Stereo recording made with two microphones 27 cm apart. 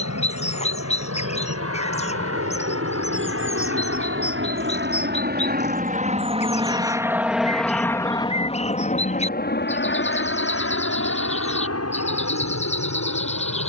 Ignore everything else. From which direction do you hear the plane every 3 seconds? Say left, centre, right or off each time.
right, right, centre, left, left.